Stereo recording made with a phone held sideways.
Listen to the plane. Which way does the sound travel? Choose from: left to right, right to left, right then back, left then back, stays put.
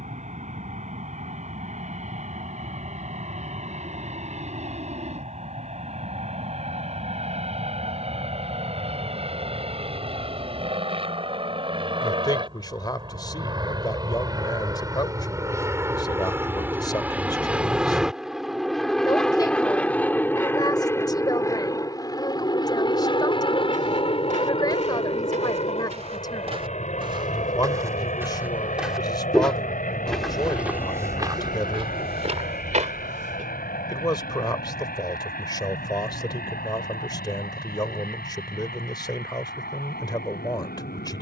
right to left.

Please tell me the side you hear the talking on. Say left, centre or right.
left.